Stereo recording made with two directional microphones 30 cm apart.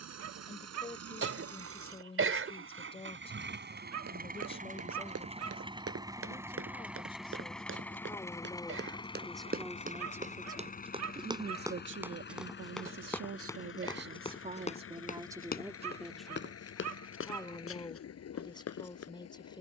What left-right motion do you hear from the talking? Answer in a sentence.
You can hear the talking go right and come back.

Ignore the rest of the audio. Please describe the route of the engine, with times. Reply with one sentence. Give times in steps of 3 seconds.
You can hear the engine on the right from 0 s, in the centre from 6 s and on the left from 9 s.